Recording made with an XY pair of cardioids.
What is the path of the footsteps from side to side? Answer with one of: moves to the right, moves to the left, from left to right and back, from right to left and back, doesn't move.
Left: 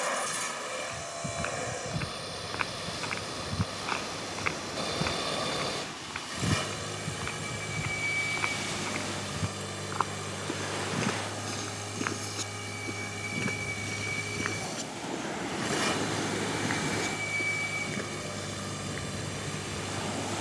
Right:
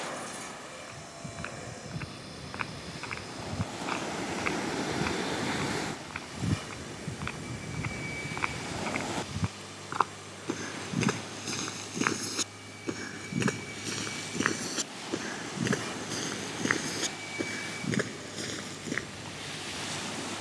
moves to the right.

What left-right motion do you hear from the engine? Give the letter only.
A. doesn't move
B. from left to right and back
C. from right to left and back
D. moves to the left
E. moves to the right
A.